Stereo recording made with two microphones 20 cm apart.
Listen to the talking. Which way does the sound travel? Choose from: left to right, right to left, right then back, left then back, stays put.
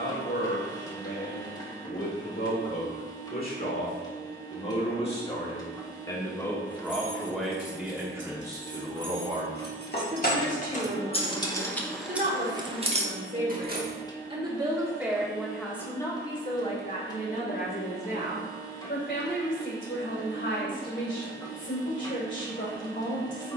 right then back.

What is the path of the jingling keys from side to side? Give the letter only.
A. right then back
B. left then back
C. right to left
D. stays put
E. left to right
E.